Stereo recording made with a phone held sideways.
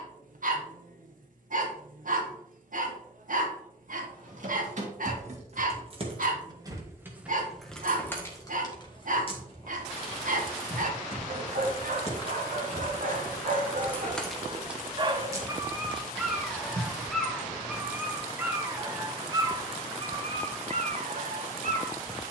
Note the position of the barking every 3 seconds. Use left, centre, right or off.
right, right, right, right, right, centre, right, right.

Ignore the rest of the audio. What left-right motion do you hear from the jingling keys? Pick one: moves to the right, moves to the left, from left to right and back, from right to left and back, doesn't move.
from right to left and back.